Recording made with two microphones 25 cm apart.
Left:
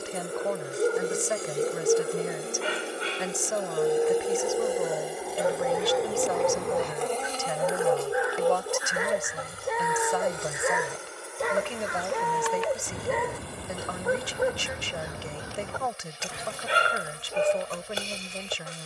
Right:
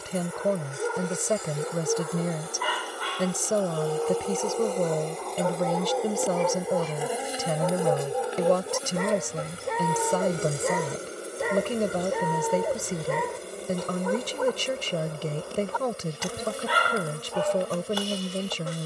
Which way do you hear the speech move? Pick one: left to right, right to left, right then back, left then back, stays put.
stays put.